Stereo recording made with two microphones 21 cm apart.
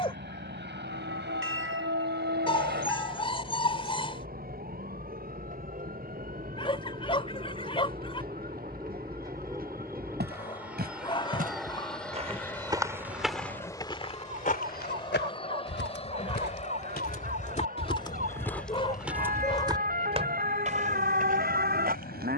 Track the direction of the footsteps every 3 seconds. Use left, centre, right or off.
off, off, off, right, centre, left, centre, right.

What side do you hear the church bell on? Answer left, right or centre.
right.